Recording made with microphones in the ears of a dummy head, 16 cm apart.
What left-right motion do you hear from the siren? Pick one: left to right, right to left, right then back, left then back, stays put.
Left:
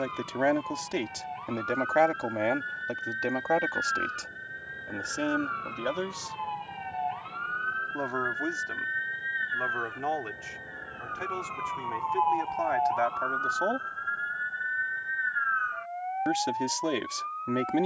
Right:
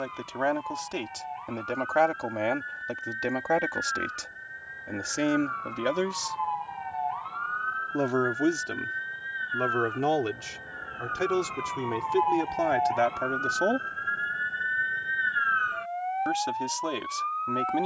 left to right.